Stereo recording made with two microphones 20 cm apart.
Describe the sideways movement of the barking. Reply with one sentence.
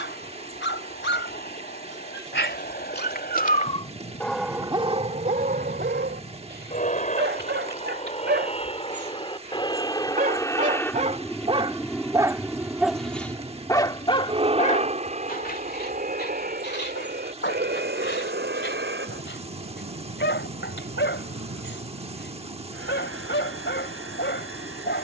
In this clip you hear the barking go right and come back.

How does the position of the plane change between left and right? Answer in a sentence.
You can hear the plane travel towards the right.